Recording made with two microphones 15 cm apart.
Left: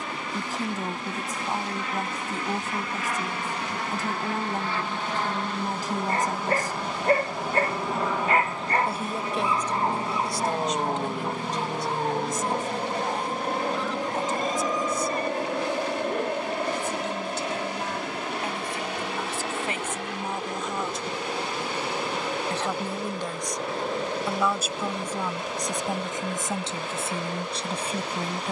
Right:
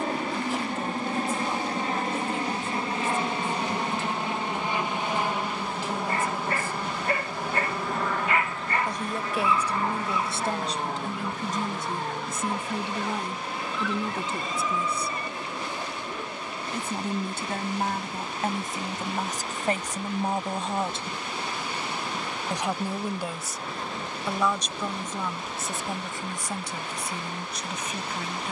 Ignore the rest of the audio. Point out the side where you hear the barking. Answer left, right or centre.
left.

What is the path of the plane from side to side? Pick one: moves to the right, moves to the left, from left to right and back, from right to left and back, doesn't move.
moves to the left.